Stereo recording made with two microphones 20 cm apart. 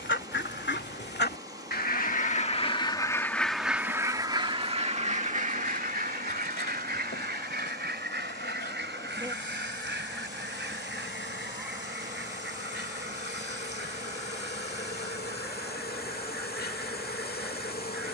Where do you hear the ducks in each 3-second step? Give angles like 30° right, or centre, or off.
50° left, 20° right, 60° right, 70° right, 70° right, 70° right.